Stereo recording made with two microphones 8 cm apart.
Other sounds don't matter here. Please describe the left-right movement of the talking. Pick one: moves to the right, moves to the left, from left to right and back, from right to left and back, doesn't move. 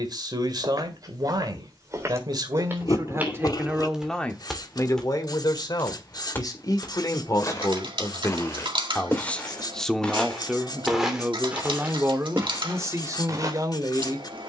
from right to left and back.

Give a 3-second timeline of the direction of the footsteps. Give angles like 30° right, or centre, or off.
40° right, centre, 30° left, centre, 40° right.